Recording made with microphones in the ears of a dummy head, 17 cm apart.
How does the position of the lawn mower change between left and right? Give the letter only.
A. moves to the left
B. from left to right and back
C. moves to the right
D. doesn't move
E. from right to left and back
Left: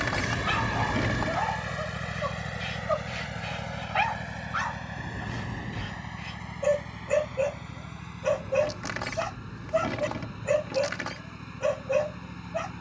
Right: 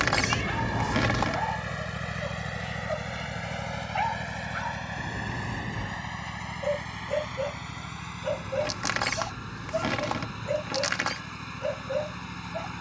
C.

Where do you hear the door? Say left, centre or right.
right.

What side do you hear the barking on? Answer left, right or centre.
left.